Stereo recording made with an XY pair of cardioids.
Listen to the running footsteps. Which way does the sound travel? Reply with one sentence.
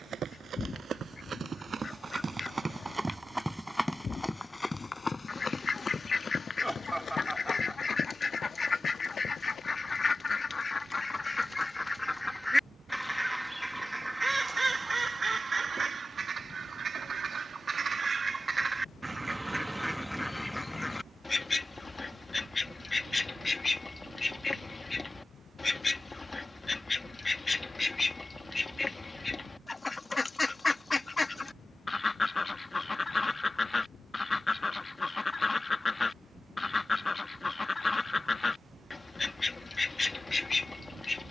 You can hear the running footsteps go from the right side to the left.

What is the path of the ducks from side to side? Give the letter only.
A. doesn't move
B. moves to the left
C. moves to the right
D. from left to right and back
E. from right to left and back
D.